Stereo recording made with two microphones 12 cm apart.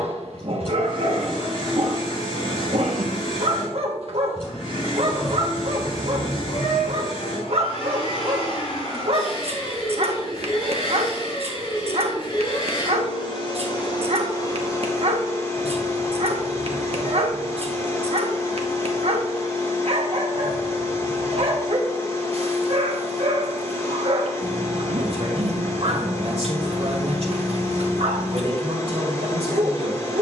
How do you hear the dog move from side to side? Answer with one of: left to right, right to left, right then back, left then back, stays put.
stays put.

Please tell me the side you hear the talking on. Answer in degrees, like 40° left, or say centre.
60° right.